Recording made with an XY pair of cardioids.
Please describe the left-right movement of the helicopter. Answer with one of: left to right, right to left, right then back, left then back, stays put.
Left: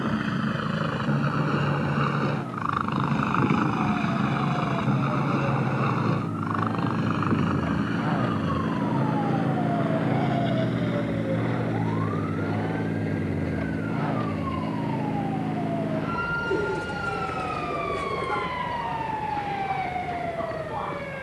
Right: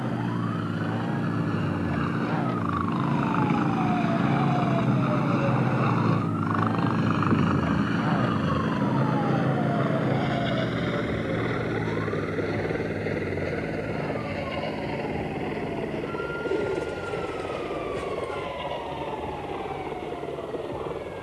left to right.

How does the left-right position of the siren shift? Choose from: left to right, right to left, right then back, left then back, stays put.
right to left.